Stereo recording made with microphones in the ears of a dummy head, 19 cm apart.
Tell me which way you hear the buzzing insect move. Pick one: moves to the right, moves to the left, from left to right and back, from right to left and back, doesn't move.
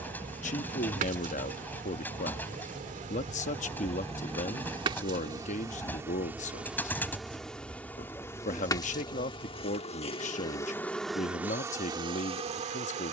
from right to left and back.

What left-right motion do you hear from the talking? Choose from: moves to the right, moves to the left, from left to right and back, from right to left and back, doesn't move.
doesn't move.